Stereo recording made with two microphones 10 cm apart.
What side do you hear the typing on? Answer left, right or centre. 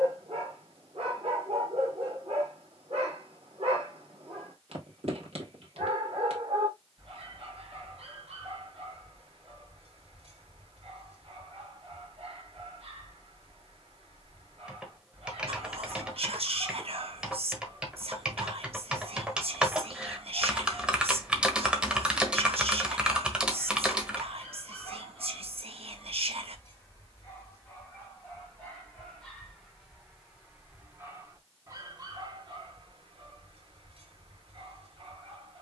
centre.